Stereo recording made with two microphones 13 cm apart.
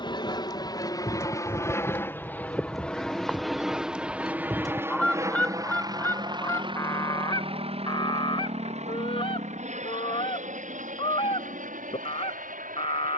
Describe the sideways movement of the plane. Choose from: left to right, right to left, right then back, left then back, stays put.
left to right.